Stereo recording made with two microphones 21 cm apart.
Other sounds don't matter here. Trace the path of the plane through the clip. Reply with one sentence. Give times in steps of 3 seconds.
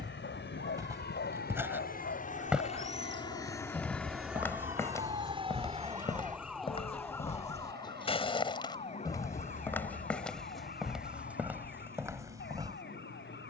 In this clip you hear the plane on the left from 0 s, in the centre from 3 s and on the right from 6 s.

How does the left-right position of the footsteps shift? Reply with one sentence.
You can hear the footsteps go left and come back.